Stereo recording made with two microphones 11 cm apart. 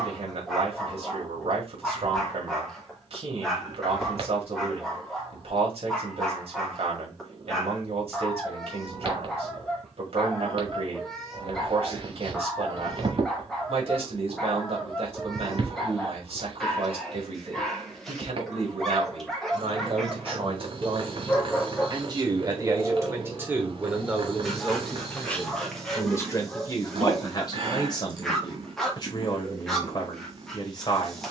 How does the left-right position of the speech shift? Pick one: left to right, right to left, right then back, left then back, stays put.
right to left.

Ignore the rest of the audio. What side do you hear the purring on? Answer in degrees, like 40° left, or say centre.
60° right.